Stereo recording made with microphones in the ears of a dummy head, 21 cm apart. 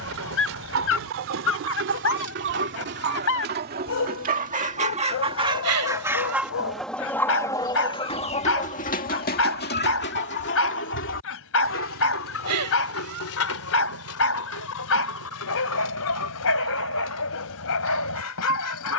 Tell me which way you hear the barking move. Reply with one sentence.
In this clip you hear the barking stay put.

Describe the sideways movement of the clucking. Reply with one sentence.
In this clip you hear the clucking move from right to left.